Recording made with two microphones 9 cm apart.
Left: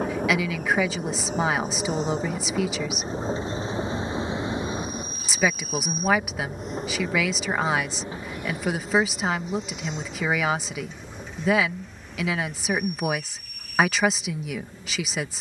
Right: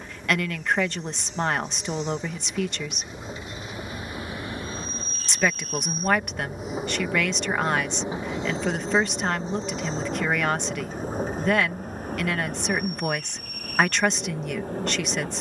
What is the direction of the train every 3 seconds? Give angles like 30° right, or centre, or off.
50° left, 20° left, 10° right, 40° right, 50° right.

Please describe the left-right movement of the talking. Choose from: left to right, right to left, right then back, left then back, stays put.
stays put.